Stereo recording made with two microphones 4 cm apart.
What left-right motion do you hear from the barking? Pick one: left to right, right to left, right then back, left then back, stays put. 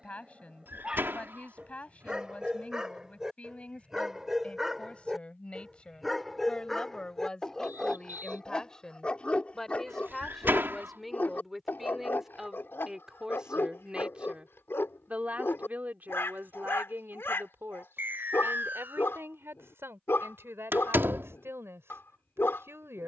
right to left.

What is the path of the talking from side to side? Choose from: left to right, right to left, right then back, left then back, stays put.
left to right.